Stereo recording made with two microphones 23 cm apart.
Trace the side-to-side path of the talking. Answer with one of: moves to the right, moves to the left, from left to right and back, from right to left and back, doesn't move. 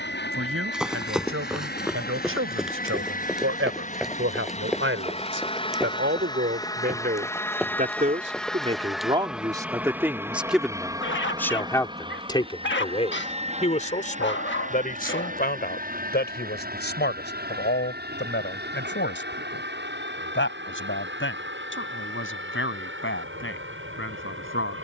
moves to the left.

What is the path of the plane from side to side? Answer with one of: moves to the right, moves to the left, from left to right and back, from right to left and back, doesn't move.
moves to the right.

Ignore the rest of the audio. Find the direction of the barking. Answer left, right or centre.
left.